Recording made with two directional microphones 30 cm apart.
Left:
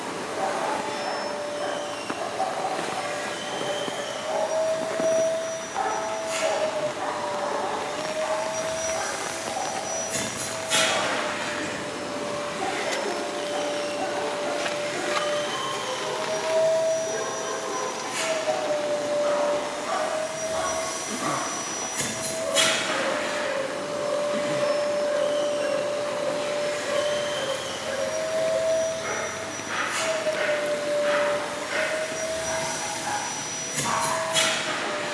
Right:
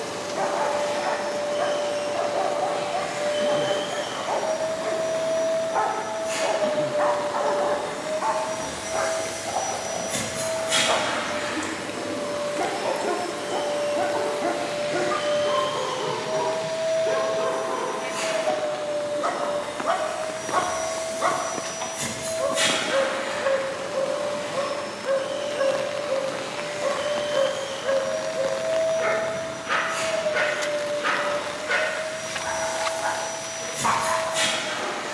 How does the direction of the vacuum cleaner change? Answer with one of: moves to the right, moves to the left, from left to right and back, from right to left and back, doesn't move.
moves to the left.